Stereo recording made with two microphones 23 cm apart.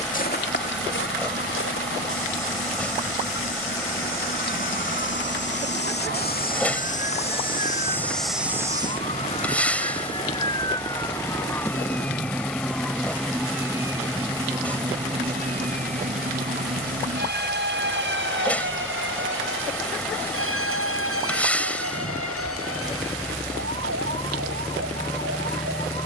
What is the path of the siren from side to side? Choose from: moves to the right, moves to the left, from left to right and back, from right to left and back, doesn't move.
moves to the right.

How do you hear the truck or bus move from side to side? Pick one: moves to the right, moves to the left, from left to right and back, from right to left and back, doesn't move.
doesn't move.